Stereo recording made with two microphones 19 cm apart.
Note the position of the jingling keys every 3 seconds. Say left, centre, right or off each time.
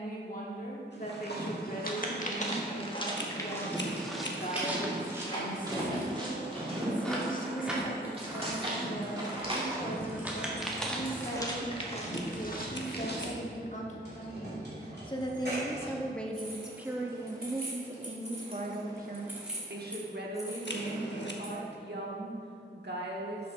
off, left, centre, right, right, right, centre, off.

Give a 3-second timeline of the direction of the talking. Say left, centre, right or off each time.
left, left, left, left, left, centre, right, right.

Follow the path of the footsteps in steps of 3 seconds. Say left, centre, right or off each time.
left, centre, right, centre, left, off, off, off.